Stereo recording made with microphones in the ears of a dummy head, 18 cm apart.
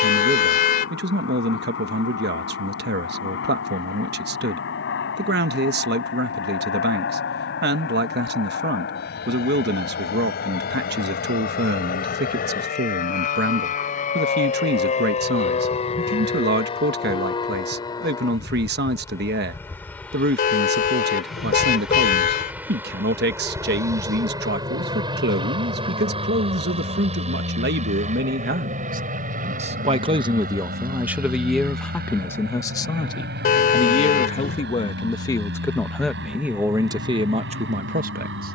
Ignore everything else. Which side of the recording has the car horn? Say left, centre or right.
left.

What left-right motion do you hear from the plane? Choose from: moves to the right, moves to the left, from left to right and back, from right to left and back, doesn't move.
moves to the right.